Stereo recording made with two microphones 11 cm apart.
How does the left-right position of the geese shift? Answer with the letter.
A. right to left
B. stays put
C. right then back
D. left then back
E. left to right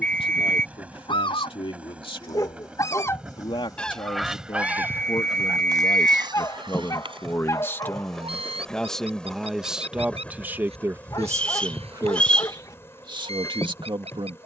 E.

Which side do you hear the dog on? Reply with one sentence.
In this clip you hear the dog on the left.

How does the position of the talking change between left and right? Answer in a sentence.
In this clip you hear the talking move from left to right.